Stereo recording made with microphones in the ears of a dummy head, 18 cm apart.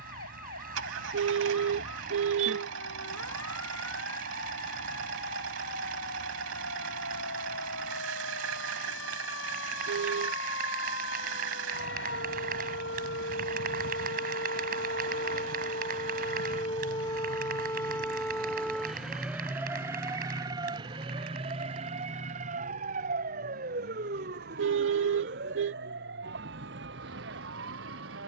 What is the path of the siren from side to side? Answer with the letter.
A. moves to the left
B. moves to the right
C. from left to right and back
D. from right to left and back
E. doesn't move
B.